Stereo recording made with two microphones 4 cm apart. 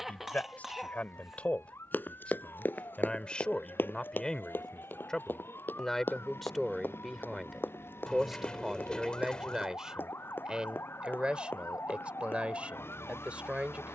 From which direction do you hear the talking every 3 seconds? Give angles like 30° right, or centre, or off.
30° left, 20° left, centre, 20° right, 30° right.